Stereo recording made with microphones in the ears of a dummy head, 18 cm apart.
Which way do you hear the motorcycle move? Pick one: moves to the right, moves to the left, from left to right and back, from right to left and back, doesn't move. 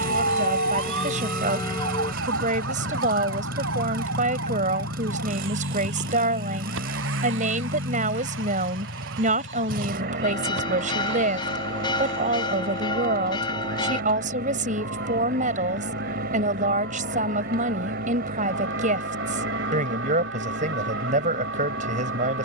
doesn't move.